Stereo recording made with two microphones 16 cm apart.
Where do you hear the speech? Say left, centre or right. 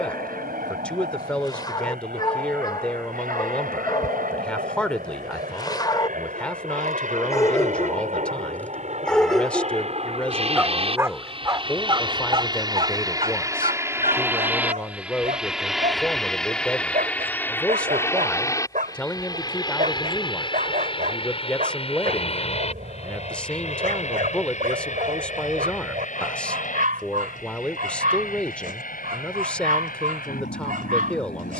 centre.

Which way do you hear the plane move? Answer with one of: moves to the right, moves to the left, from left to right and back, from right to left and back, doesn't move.
moves to the left.